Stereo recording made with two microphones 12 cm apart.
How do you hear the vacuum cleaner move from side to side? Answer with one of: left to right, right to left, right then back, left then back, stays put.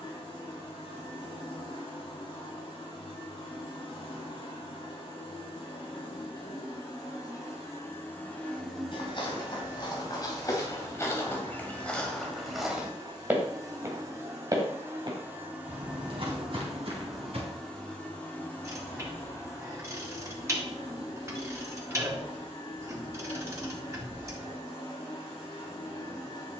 right then back.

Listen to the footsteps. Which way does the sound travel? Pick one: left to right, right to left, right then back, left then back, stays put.
left to right.